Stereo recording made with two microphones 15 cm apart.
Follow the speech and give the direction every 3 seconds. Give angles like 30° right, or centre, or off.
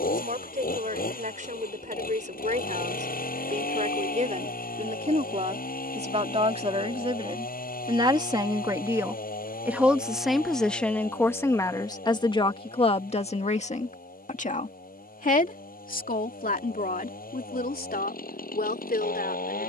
60° right, 50° right, 30° right, 10° left, 40° left, 70° left, 80° left.